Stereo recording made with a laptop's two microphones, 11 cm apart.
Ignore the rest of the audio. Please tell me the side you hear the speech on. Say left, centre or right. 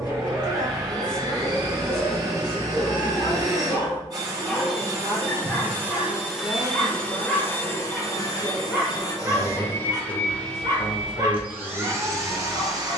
left.